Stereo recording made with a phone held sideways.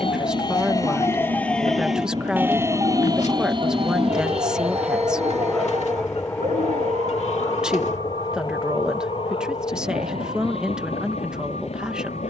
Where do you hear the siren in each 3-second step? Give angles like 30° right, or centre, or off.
10° left, 50° right, 60° right, 70° right.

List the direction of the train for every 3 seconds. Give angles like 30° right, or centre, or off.
40° right, 10° right, 30° left, 50° left.